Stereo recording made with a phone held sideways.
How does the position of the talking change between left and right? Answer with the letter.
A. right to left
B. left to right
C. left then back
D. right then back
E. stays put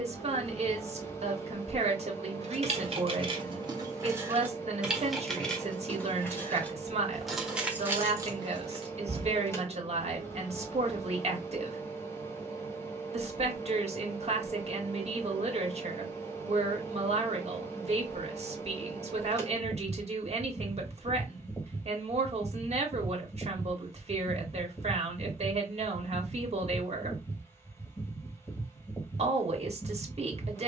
E.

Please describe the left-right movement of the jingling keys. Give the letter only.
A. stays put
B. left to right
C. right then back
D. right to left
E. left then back
E.